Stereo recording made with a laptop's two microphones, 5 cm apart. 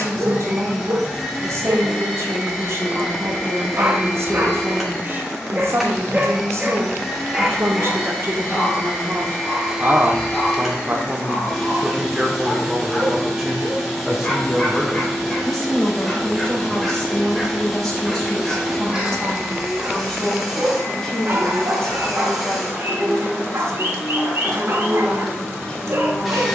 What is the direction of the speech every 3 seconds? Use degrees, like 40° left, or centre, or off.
70° right, 70° right, 60° right, 30° right, 10° right, 10° left, 10° left, 10° left, 10° left.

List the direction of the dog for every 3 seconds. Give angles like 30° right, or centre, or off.
70° right, 40° right, 10° right, 10° left, 20° left, 10° left, 20° right, 60° right, 60° right.